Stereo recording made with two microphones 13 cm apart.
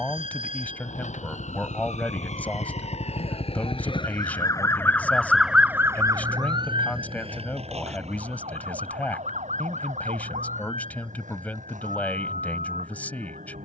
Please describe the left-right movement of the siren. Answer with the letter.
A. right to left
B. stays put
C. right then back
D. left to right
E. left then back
D.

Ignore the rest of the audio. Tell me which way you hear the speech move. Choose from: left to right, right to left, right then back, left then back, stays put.
stays put.